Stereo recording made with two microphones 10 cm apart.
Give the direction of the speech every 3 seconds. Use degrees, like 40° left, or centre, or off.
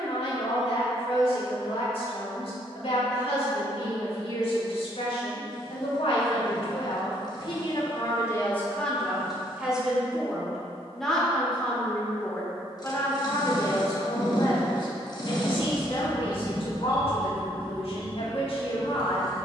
70° left, 70° left, 50° left, centre, 30° left, 60° left, 70° left.